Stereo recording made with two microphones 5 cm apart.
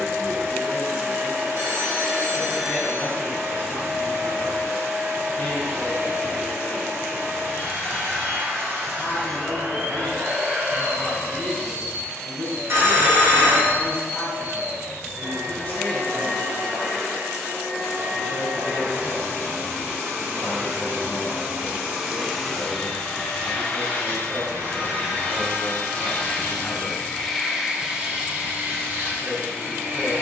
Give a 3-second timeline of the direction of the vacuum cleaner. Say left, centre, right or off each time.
right, right, right, right, right, right, right, centre, left, right.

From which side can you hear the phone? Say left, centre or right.
right.